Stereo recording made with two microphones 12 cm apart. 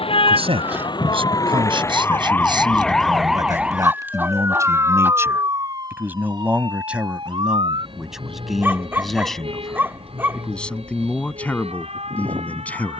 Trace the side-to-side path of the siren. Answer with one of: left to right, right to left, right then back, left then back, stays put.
left to right.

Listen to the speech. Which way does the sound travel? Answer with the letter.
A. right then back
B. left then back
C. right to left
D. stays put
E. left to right
C.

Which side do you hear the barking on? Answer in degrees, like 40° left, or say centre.
20° right.